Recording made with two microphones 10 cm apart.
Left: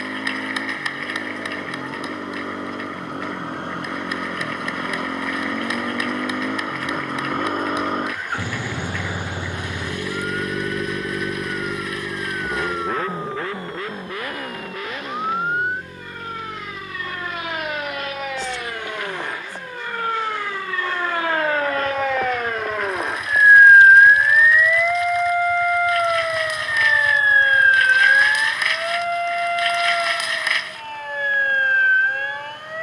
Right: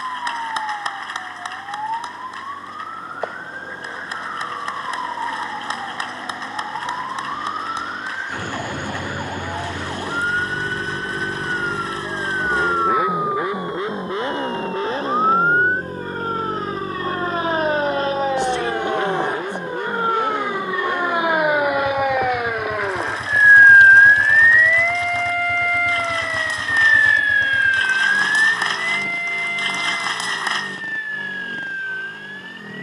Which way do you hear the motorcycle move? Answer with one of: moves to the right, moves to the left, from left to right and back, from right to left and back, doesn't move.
moves to the right.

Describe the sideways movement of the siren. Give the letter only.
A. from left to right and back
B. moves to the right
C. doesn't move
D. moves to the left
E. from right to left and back
D.